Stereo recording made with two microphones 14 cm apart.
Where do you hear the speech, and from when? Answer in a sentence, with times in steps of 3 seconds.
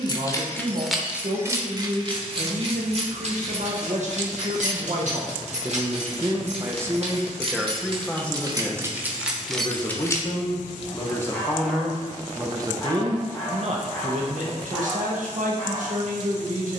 In this clip you hear the speech on the right from 0 s, in the centre from 6 s, on the left from 9 s and on the right from 12 s.